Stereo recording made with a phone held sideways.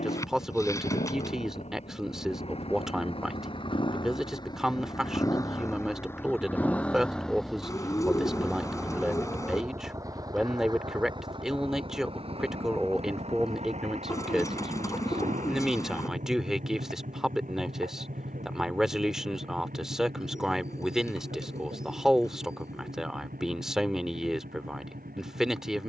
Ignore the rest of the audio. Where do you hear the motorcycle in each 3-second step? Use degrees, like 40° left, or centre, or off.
50° left, 30° left, centre, 30° right, 50° right, 60° right, 60° right, 70° right, 70° right.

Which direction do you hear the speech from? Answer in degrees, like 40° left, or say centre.
centre.